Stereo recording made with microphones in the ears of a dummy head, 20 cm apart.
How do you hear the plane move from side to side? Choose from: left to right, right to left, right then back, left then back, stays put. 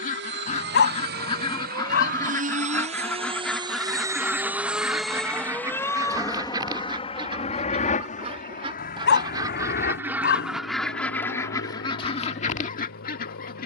right to left.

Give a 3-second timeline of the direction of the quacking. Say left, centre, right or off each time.
left, centre, right, centre, left.